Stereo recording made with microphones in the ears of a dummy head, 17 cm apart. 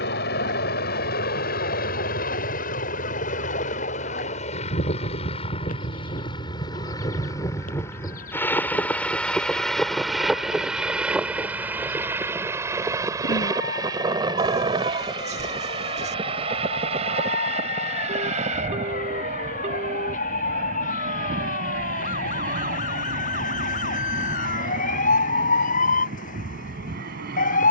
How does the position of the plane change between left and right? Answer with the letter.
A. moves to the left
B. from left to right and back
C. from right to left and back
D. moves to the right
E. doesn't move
D.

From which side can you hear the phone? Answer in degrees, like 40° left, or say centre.
40° right.